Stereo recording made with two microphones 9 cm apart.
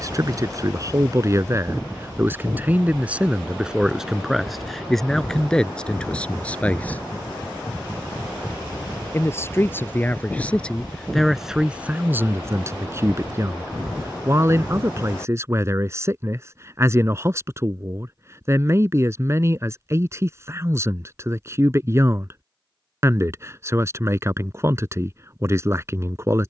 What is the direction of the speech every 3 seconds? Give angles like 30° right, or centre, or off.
30° right, centre, 10° left, 10° left, 30° right, 30° right, 30° right, 30° right, 30° right.